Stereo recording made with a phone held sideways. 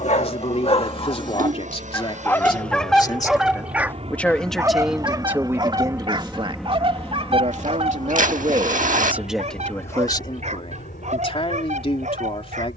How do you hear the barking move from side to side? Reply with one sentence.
In this clip you hear the barking go from the left side to the right.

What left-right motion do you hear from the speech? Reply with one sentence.
In this clip you hear the speech move from left to right and back again.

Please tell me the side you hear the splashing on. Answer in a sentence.
In this clip you hear the splashing on the right.